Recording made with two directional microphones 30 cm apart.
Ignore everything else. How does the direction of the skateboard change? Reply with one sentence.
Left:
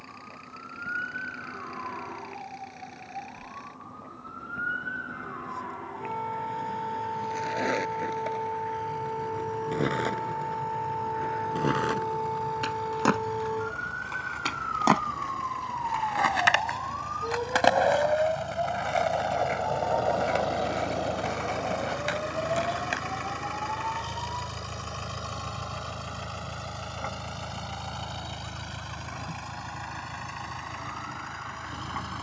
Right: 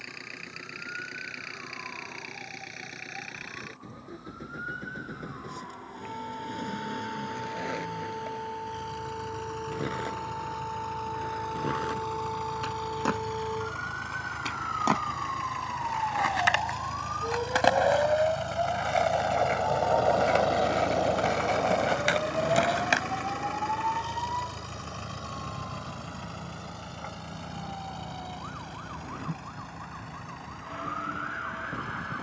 You can hear the skateboard move to the right.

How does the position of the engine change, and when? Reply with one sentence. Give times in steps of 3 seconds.
In this clip you hear the engine on the right from 0 s, in the centre from 21 s and on the left from 24 s.